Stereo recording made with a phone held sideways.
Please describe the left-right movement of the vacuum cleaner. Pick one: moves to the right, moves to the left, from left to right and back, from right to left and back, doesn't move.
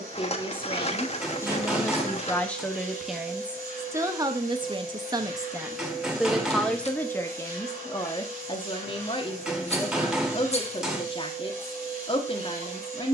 doesn't move.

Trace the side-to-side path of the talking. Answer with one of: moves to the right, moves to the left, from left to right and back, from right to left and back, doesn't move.
from left to right and back.